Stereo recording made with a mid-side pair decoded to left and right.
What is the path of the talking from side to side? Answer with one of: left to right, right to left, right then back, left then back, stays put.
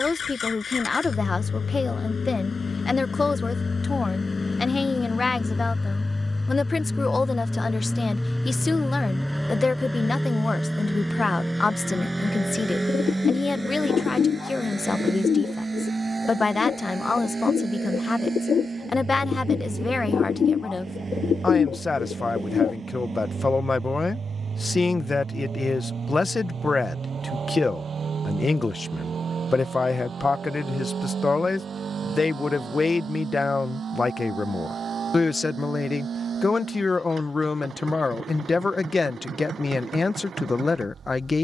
stays put.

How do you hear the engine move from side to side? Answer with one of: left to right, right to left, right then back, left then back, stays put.
left to right.